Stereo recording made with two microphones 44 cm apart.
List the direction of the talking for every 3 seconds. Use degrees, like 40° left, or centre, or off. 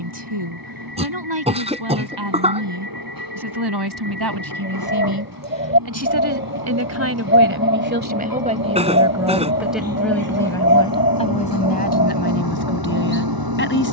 70° right, 60° right, 30° right, 10° left, 30° left.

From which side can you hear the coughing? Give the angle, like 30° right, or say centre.
10° right.